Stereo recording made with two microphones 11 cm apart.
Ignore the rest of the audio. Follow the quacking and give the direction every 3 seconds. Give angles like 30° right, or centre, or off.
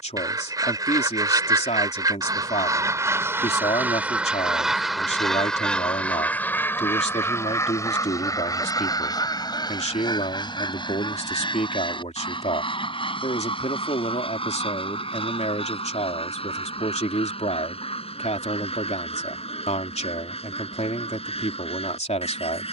30° right, 10° right, 20° left, 40° left, 50° left, 60° left, 60° left, 60° left.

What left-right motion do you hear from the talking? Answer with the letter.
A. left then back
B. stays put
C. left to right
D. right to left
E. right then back
B.